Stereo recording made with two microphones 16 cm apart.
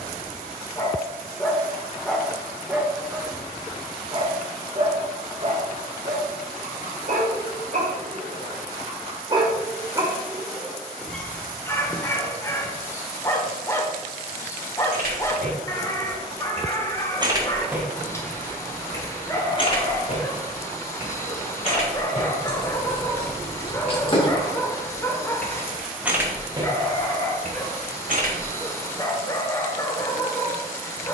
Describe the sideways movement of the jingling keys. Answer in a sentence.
In this clip you hear the jingling keys go left and come back.